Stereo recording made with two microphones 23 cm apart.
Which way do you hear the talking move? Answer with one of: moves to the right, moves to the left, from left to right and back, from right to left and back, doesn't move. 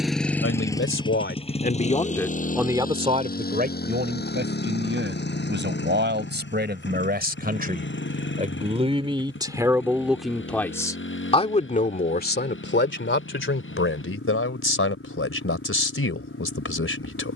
from left to right and back.